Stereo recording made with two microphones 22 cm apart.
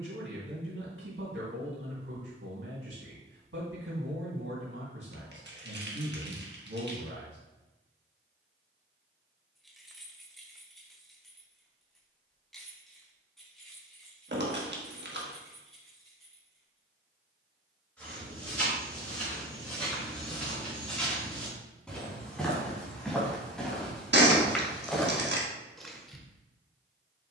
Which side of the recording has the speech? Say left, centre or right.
right.